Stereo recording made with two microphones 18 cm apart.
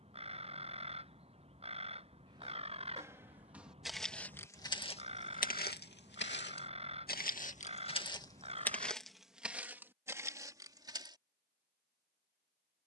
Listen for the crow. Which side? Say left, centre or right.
right.